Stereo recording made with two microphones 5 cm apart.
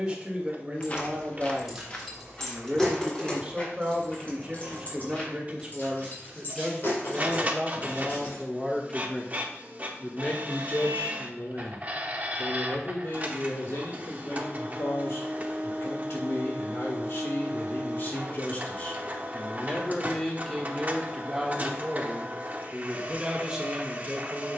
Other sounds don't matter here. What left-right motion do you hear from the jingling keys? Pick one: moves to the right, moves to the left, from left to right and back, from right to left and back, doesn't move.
moves to the left.